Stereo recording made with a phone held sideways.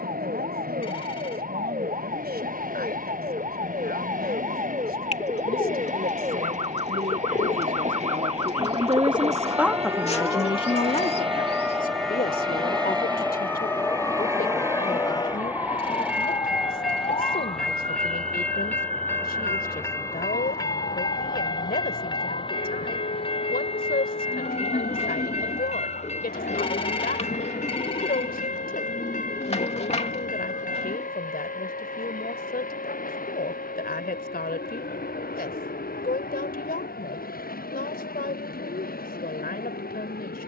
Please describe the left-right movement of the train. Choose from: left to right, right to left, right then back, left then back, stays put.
right to left.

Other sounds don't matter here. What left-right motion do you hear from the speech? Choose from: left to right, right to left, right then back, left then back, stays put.
right to left.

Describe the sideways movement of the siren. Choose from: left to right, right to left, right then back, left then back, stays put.
right to left.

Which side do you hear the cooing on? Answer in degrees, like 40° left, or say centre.
40° left.